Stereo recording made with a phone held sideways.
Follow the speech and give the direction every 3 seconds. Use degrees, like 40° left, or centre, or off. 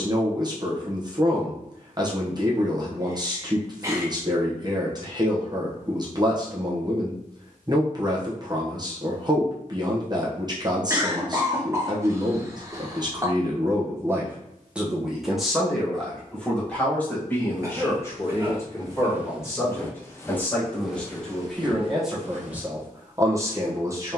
30° right, 30° right, 30° right, 30° right, 20° right, 10° left, 20° left, 10° right.